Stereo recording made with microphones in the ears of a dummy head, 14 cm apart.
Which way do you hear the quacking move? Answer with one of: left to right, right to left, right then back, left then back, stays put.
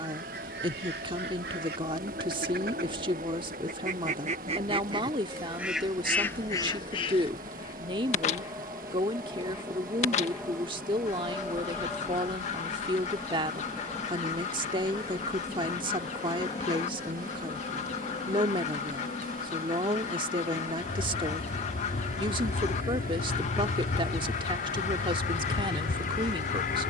right to left.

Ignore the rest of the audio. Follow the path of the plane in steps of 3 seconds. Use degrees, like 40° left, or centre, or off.
50° right, 40° right, 30° right, 10° right, 10° left, 30° left, 40° left, 40° left, 50° left.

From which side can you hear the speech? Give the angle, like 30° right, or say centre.
30° right.